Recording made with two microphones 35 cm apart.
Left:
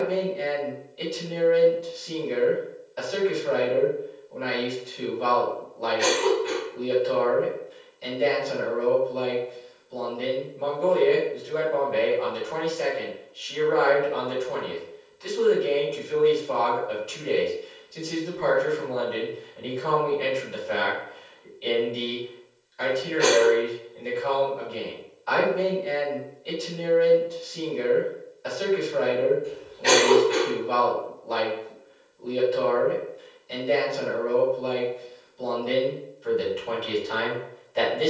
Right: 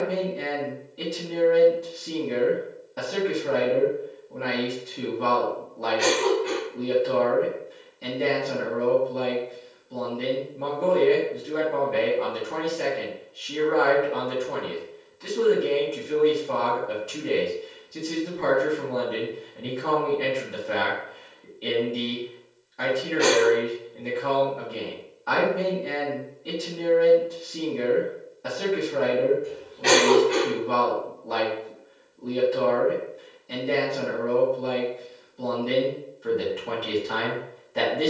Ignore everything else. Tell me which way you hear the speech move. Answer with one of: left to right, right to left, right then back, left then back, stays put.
stays put.